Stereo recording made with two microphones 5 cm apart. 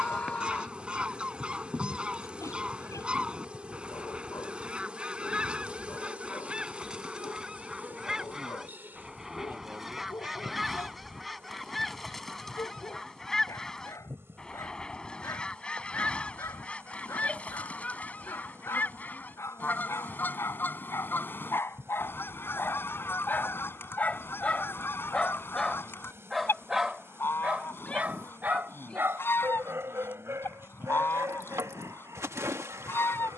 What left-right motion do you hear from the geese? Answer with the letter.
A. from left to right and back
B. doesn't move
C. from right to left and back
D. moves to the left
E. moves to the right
D.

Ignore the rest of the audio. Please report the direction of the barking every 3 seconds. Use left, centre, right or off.
left, left, left, left, left, left, left, left, centre, right, right.